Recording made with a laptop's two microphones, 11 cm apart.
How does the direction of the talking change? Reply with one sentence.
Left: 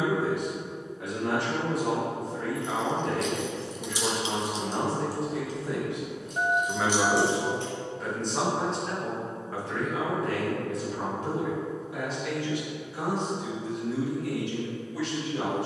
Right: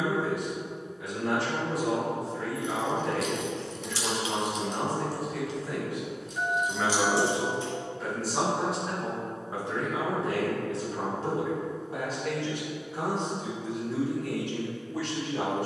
You can hear the talking travel towards the right.